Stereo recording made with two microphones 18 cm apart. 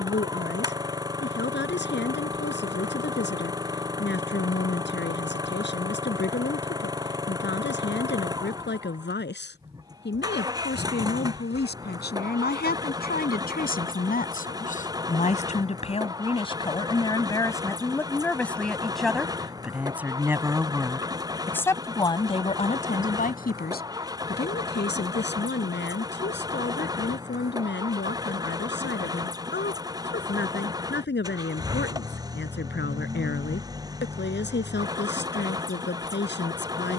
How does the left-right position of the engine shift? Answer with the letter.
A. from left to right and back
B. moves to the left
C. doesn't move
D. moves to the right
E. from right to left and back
C.